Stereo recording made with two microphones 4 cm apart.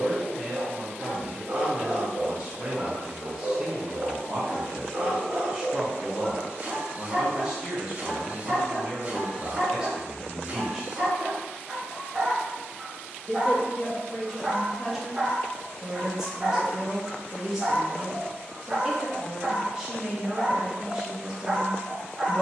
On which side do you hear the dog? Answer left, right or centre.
right.